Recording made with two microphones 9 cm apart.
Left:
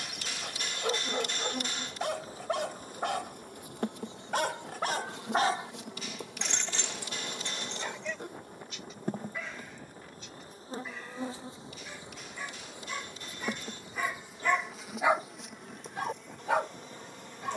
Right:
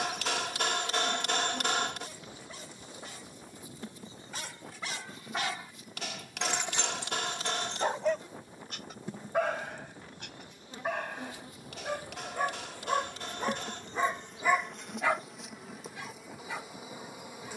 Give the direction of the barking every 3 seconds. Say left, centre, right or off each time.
left, left, right, right, right, left.